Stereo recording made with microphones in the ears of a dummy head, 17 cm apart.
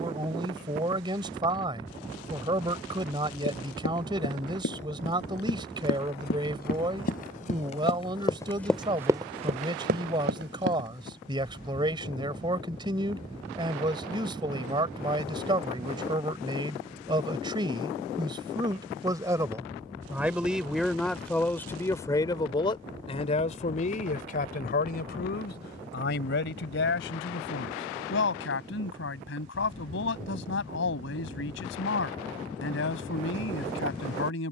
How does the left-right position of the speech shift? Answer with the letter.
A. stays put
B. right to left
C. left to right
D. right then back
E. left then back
B.